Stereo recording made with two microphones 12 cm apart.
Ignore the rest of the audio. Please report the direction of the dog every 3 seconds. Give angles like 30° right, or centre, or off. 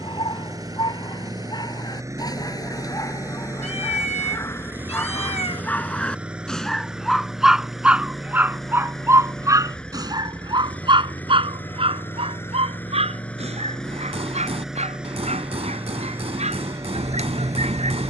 40° left, 20° left, 10° right, 40° right, 60° right, 70° right.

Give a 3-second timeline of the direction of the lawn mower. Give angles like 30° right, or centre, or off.
30° right, 20° right, centre, 10° left, 10° left, 20° right.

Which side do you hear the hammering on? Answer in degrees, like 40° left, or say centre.
60° right.